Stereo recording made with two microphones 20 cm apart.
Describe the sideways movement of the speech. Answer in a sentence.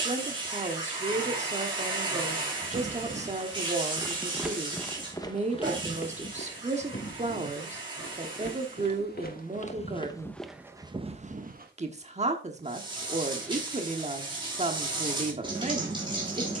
In this clip you hear the speech stay put.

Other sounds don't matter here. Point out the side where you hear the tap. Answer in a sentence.
In this clip you hear the tap on the right.